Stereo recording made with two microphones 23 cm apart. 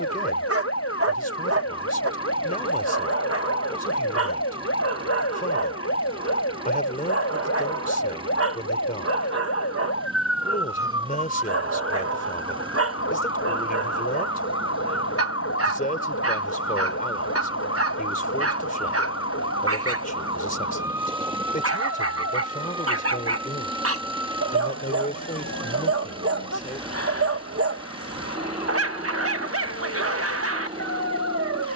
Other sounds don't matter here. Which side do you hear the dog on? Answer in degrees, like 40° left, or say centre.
80° right.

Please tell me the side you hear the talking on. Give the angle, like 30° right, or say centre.
40° left.